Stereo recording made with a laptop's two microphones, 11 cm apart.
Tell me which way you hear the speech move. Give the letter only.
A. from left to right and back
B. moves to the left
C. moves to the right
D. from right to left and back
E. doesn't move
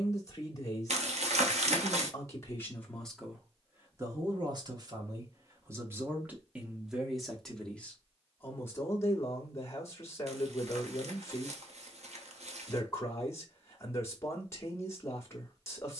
A.